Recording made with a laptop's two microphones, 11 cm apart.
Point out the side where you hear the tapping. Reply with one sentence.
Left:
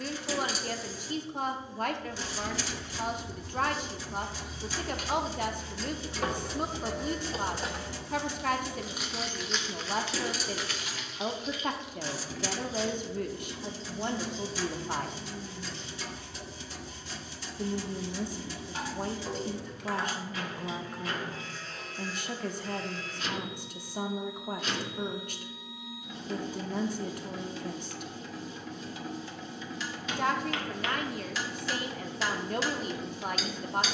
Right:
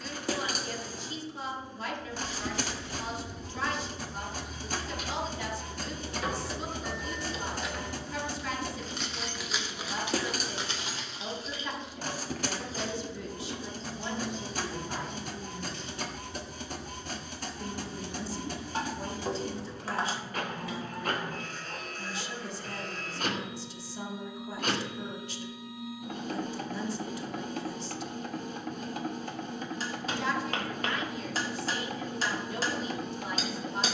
You can hear the tapping on the right.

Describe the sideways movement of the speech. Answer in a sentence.
You can hear the speech stay put.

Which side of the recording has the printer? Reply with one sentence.
In this clip you hear the printer on the right.